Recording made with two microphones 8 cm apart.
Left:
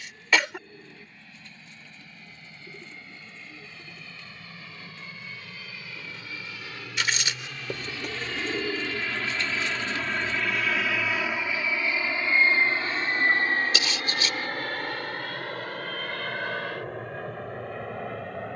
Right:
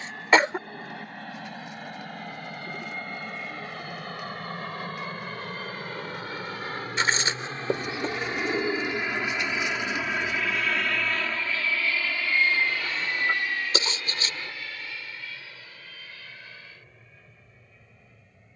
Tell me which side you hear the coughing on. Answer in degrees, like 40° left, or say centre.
30° right.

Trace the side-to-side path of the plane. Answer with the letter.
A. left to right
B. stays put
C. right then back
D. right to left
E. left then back
D.